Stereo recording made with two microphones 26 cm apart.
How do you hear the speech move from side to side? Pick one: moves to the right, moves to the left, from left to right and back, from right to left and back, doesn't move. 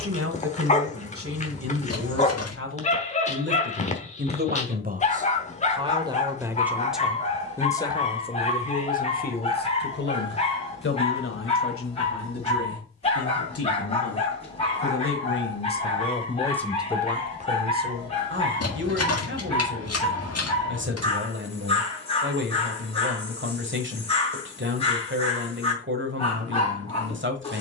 from right to left and back.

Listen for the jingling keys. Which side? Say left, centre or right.
left.